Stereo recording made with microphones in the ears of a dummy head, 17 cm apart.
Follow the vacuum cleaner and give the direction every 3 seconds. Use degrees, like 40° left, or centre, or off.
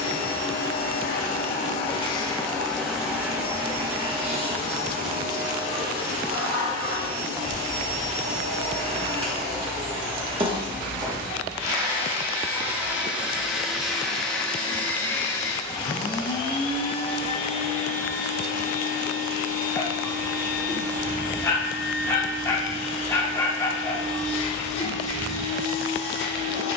40° left, 30° right, 40° right, 30° right, centre, 20° left, 50° left, 60° left, 60° left.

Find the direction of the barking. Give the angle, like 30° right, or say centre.
20° left.